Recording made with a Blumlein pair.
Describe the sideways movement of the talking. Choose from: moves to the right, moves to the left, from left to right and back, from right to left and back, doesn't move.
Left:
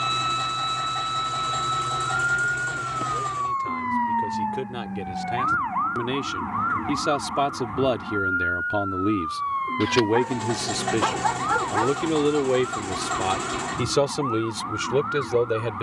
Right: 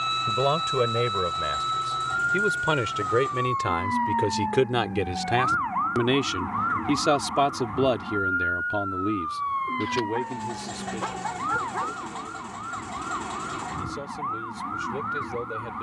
moves to the left.